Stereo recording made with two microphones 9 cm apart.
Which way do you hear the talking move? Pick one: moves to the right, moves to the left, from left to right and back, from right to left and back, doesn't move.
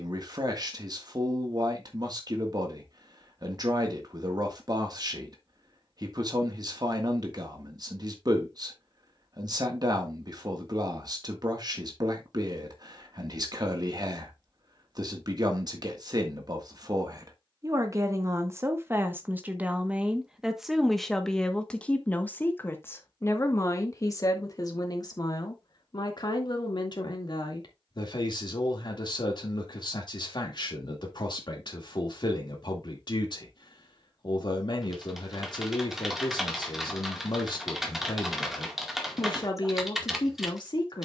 moves to the left.